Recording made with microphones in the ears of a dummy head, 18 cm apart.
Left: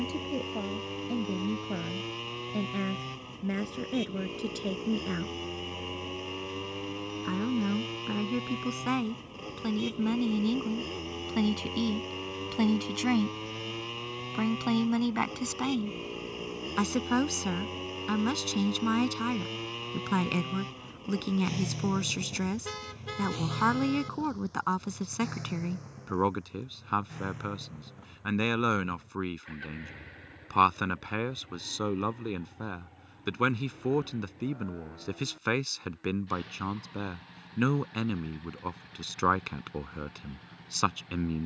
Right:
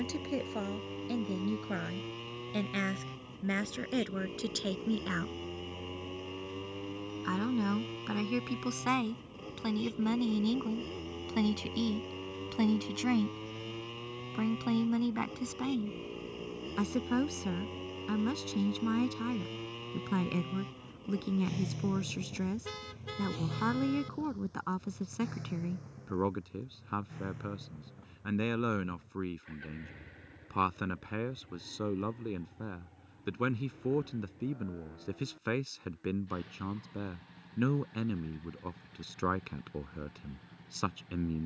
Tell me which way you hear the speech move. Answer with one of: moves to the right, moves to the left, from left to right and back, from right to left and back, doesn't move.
moves to the left.